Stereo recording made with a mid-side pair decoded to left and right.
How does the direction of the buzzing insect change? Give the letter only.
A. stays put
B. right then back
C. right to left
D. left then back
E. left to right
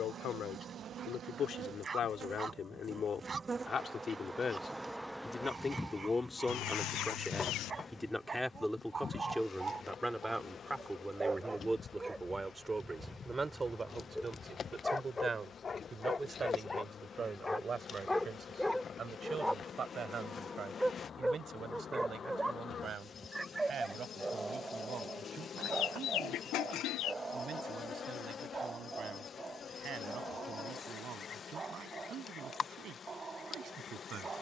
C.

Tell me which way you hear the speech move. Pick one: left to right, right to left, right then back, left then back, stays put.
left to right.